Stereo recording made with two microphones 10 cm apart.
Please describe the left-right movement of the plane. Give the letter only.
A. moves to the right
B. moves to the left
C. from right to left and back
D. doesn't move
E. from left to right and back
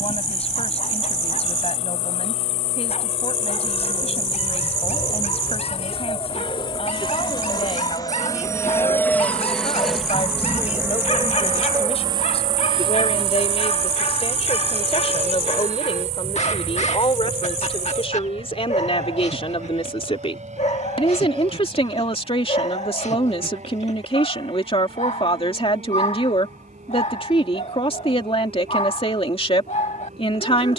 A.